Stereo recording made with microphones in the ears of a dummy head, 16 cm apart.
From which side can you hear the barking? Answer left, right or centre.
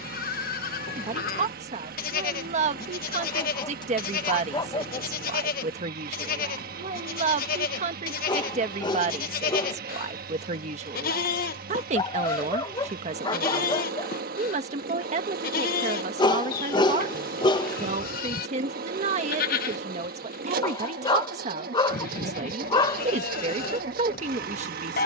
left.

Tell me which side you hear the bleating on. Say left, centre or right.
left.